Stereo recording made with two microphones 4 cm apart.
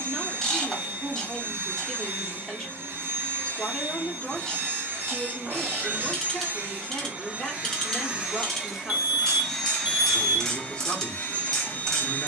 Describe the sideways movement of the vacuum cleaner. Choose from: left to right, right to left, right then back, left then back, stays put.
right to left.